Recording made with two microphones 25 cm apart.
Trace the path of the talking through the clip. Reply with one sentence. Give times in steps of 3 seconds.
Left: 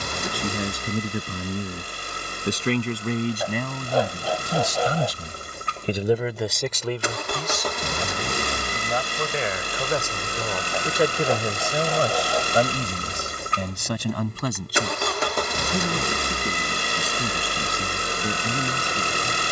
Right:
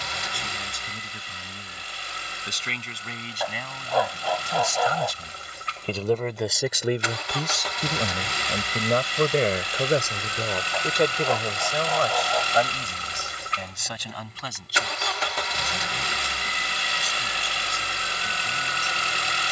In this clip you hear the talking on the left from 0 s, on the right from 6 s, in the centre from 9 s and on the left from 12 s.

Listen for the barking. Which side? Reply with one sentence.
In this clip you hear the barking on the left.